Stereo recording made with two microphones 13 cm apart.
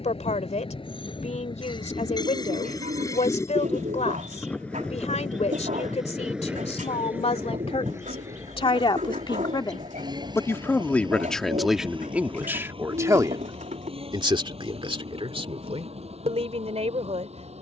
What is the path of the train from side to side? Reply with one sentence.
You can hear the train go from the left side to the right.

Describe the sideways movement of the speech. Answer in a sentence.
In this clip you hear the speech move from left to right.